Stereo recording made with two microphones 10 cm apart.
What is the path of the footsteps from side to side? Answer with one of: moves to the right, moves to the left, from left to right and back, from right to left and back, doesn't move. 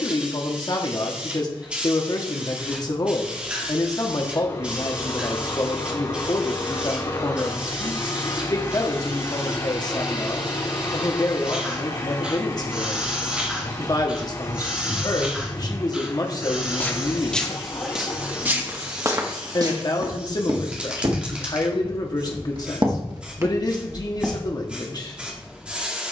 from left to right and back.